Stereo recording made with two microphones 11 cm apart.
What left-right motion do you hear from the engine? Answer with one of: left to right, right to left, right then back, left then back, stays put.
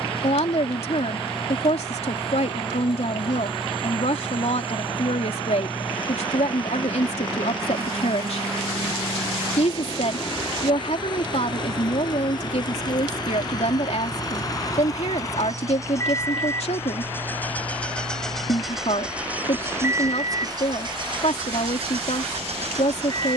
left to right.